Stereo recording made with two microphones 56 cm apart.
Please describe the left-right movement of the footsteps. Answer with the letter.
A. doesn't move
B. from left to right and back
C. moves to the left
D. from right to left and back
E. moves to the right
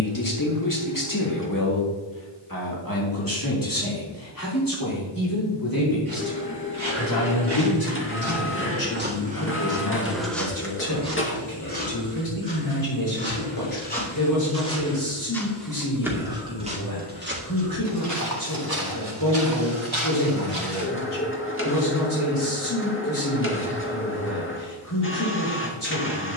D.